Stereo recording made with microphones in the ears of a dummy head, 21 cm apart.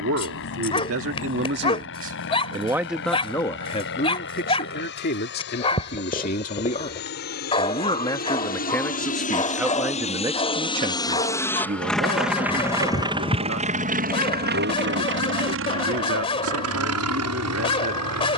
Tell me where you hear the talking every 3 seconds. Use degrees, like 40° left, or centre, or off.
50° right, 30° left, 20° left, 20° right, 60° right, 60° right.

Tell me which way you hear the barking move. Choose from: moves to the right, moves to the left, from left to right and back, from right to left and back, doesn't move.
doesn't move.